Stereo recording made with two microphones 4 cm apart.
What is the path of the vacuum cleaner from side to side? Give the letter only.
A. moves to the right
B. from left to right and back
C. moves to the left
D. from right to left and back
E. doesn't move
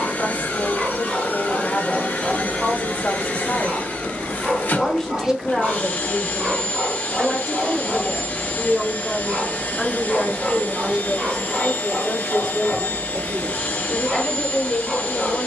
E.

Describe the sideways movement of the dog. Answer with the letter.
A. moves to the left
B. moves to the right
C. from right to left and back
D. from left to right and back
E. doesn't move
E.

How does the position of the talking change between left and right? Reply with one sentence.
You can hear the talking go right and come back.